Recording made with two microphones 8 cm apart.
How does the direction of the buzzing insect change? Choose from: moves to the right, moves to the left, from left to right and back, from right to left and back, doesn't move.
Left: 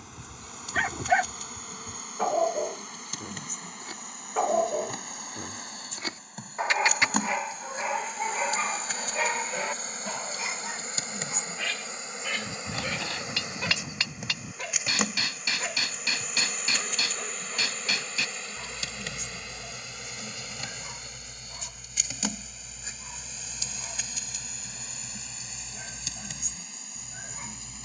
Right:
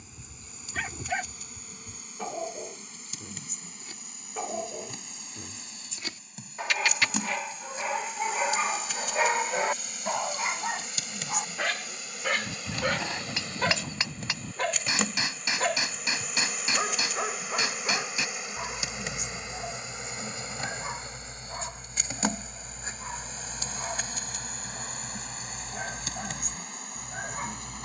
moves to the right.